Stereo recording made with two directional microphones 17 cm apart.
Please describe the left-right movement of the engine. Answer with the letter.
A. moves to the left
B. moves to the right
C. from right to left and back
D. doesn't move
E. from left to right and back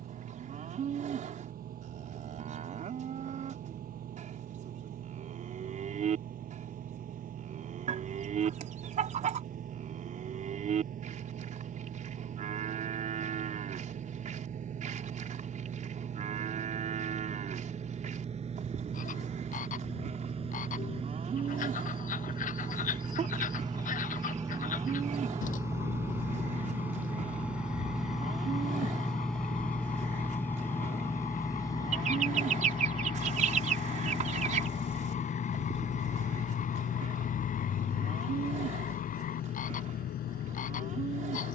A.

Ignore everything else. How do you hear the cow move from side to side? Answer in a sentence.
You can hear the cow stay in one place.